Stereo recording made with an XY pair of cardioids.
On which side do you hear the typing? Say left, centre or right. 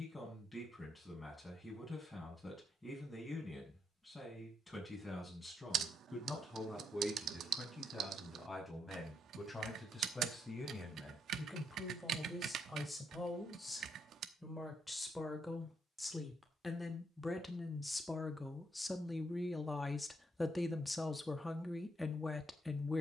right.